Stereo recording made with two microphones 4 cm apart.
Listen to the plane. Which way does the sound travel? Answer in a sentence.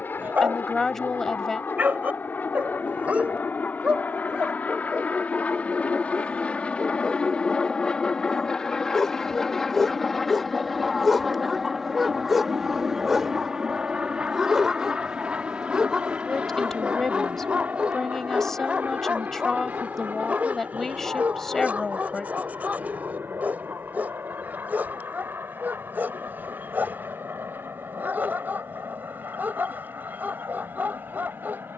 In this clip you hear the plane go from the left side to the right.